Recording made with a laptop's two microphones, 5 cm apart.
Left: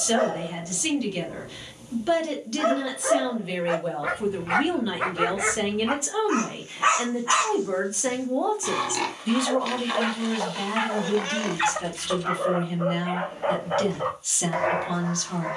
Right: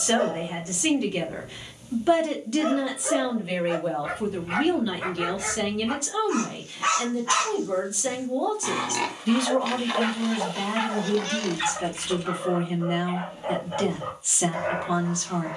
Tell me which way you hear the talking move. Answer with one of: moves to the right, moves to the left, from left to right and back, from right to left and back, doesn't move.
from right to left and back.